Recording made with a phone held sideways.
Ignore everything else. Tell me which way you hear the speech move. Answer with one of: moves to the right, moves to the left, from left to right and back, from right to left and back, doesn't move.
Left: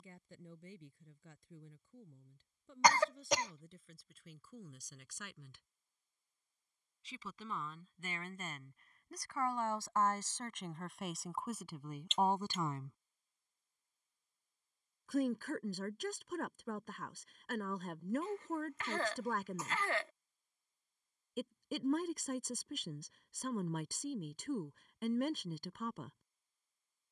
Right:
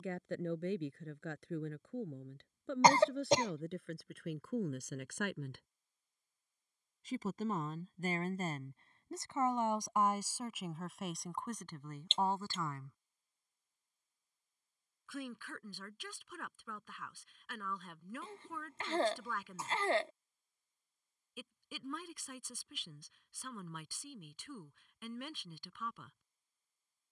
moves to the left.